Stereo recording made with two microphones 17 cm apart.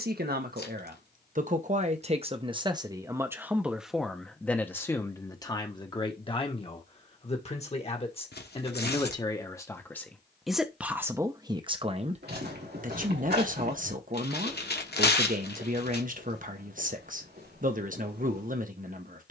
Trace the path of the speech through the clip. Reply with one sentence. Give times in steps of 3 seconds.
You can hear the speech on the right from 0 s, in the centre from 3 s, on the left from 6 s, in the centre from 9 s and on the right from 12 s.